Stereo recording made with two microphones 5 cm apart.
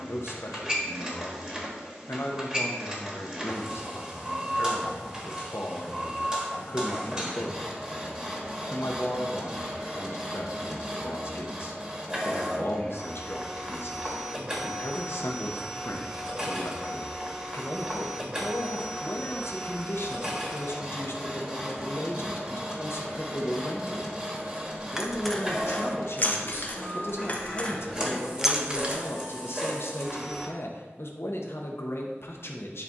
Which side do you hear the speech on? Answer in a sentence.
In this clip you hear the speech on the left.